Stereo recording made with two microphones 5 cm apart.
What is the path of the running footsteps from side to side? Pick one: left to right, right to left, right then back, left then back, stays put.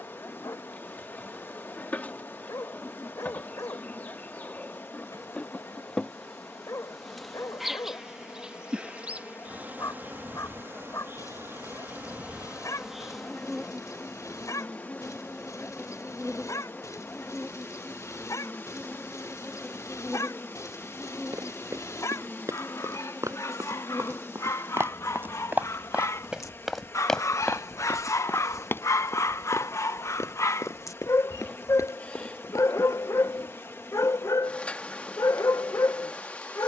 right to left.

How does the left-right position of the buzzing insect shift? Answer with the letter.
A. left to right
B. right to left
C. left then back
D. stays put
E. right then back
E.